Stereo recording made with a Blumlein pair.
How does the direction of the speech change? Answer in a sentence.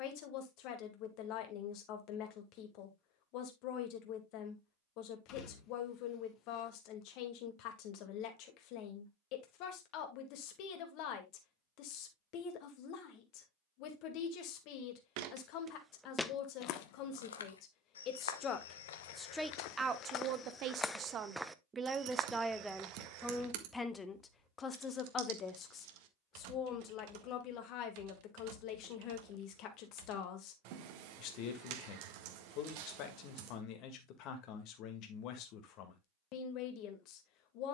You can hear the speech go right and come back.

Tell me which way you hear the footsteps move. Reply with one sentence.
You can hear the footsteps move from right to left and back again.